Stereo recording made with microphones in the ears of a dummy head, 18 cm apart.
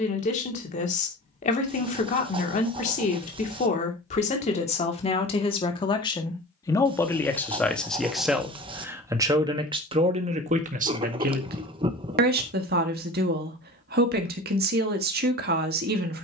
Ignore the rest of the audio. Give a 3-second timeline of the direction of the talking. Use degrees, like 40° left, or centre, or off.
40° left, 30° left, 10° left, 30° right, 50° right, 50° right.